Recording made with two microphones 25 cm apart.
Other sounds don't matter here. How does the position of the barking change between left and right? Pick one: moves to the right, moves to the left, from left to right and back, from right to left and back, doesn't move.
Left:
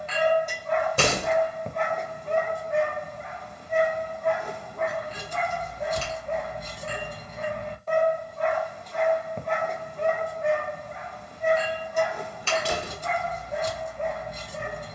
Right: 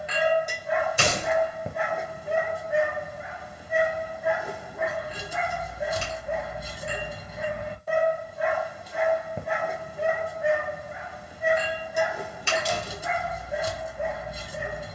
doesn't move.